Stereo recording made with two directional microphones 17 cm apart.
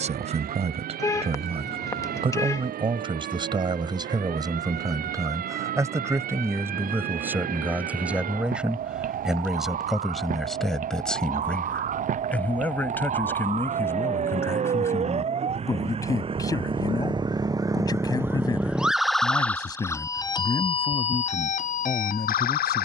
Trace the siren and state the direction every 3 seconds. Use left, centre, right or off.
right, right, right, right, right, right, centre, left.